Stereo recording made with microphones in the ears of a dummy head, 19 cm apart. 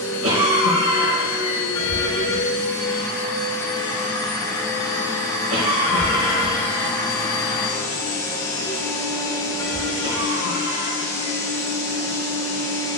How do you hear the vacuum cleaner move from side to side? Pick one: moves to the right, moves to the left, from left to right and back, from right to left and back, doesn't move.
doesn't move.